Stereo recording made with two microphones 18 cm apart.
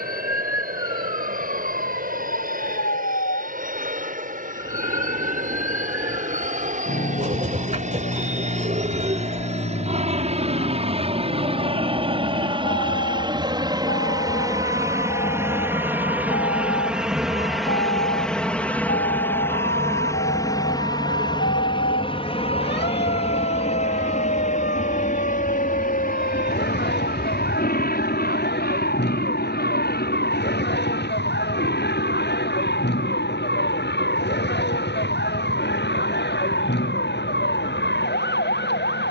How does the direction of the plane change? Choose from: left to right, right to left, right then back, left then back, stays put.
right to left.